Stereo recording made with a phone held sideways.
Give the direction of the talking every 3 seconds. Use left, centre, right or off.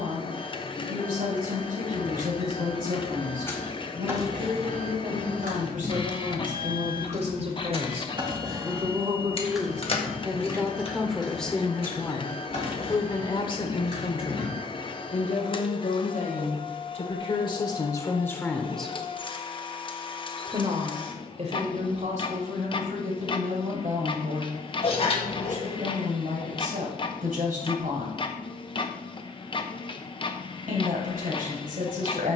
right, right, right, centre, left, left, centre, right, right, right, right.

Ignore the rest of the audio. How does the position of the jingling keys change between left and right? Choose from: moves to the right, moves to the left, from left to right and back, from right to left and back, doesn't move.
from left to right and back.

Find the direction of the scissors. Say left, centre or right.
left.